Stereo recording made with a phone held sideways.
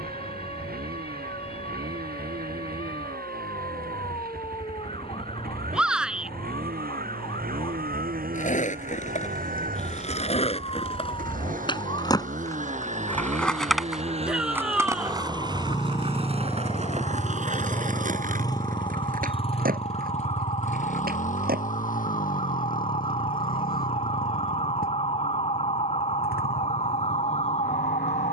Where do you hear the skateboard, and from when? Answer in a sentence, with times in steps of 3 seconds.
You can hear the skateboard not at all from 0 s, on the left from 6 s, in the centre from 12 s, on the right from 15 s and not at all from 24 s.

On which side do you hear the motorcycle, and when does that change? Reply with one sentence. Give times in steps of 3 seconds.
In this clip you hear the motorcycle on the right from 0 s, in the centre from 15 s and on the left from 18 s.